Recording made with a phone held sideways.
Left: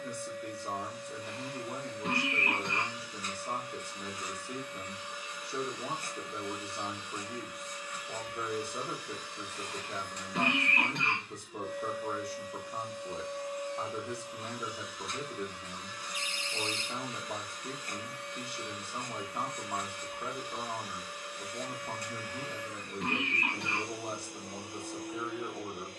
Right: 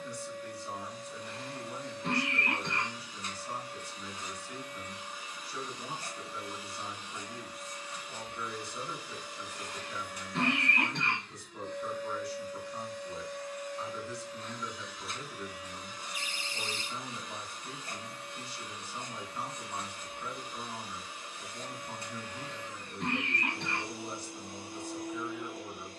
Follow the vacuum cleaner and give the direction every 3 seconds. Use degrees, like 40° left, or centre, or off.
30° right, 30° right, 30° right, centre, 20° left, 20° right, 30° right, 30° right, 30° right.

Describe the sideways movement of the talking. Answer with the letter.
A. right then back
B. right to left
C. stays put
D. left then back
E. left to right
C.